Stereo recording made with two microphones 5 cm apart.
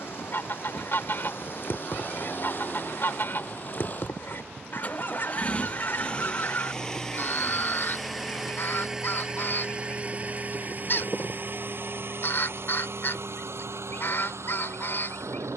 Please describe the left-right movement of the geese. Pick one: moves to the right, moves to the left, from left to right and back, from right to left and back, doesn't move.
doesn't move.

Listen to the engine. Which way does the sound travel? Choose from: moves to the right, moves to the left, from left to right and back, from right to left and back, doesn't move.
moves to the right.